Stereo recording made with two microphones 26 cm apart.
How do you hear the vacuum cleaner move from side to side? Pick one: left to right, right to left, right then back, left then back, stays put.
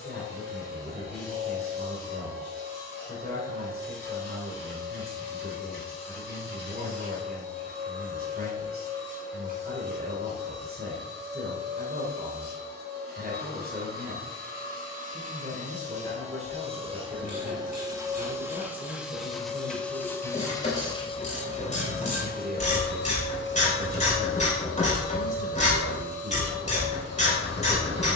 right to left.